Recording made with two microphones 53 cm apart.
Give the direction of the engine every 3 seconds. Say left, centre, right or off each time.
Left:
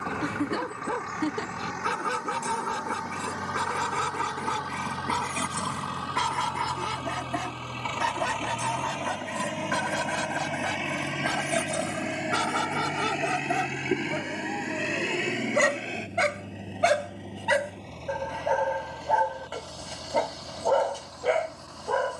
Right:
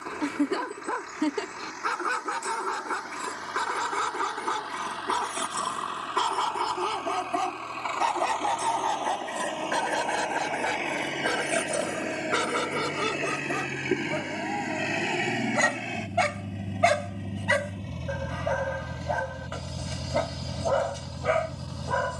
left, left, left, left, centre, right, right, right.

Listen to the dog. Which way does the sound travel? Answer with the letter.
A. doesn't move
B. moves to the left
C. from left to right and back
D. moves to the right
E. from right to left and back
D.